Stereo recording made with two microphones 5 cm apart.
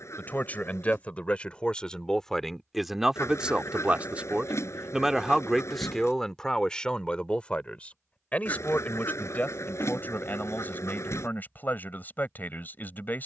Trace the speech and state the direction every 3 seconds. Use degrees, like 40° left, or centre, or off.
20° left, 10° right, 20° left, 40° left, 40° left.